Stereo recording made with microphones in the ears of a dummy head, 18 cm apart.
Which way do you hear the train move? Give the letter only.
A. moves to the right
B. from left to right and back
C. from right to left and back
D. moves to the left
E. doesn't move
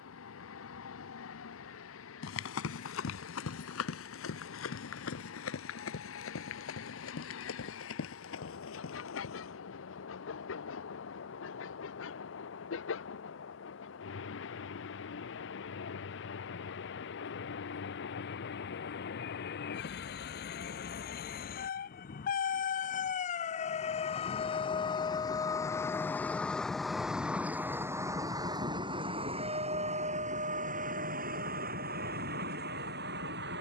A.